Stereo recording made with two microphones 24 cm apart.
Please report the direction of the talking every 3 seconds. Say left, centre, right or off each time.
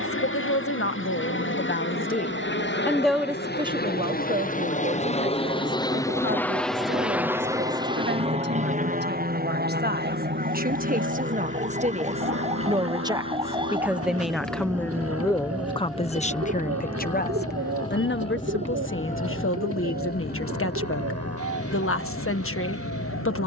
left, right, right, right, centre, left, left, left.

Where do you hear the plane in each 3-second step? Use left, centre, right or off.
left, left, centre, right, right, right, right, right.